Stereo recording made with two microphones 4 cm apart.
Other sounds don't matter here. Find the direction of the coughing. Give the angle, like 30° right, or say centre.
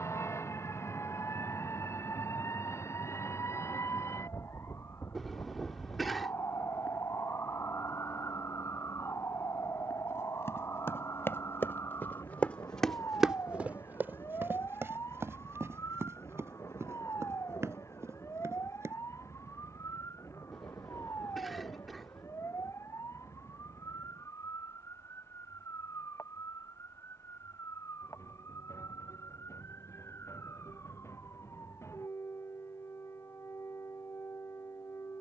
centre.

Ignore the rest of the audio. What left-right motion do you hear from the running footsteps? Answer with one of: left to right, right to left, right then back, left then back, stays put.
left to right.